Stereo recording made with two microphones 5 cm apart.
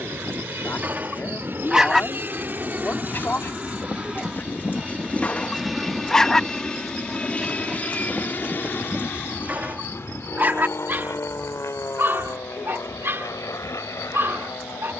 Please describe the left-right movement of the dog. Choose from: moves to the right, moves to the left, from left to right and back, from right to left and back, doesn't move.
from right to left and back.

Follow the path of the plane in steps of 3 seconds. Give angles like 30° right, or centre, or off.
50° right, 10° right, 30° left, 50° left, 60° left.